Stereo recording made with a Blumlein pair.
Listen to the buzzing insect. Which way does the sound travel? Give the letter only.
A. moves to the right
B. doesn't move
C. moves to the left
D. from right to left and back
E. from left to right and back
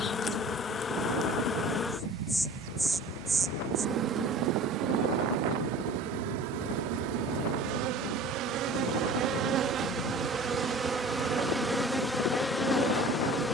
E.